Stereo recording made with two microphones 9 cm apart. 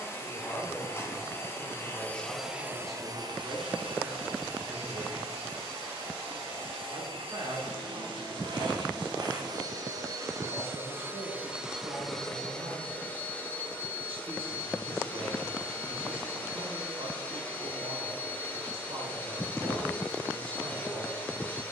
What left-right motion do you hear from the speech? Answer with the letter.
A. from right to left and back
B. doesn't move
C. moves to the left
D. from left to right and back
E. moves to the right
E.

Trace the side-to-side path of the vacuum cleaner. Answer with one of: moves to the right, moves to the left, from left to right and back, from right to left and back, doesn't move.
from left to right and back.